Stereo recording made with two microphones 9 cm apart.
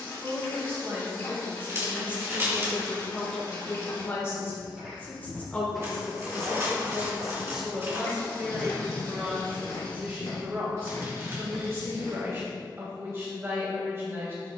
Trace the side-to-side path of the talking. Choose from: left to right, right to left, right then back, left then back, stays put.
left then back.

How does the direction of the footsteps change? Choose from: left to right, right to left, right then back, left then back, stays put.
right to left.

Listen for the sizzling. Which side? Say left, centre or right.
left.